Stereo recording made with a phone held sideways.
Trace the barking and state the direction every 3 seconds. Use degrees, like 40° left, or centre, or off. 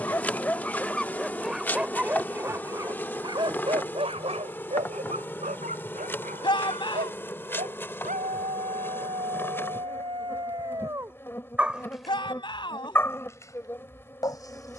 centre, 50° right, 70° right, 40° right, 20° left.